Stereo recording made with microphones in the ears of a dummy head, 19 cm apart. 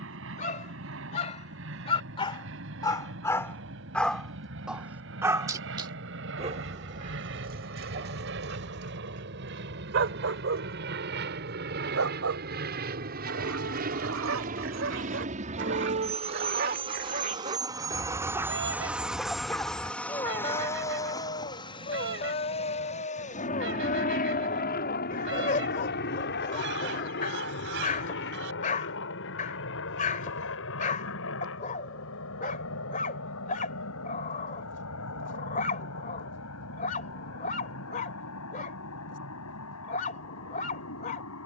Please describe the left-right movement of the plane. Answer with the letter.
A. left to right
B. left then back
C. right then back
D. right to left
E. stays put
D.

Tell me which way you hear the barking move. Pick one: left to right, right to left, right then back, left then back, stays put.
right then back.